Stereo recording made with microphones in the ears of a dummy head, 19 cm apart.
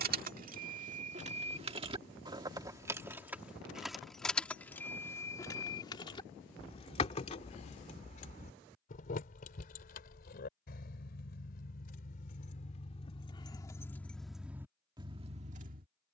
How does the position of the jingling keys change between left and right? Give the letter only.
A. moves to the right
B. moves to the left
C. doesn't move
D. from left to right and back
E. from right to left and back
E.